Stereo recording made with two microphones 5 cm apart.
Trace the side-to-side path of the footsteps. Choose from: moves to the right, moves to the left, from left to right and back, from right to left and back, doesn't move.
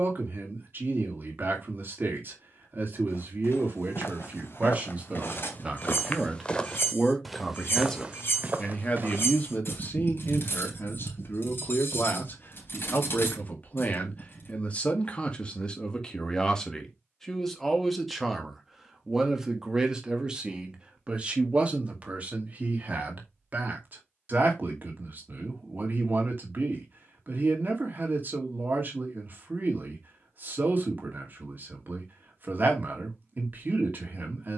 moves to the right.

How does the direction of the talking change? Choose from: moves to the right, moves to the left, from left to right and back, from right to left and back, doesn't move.
from right to left and back.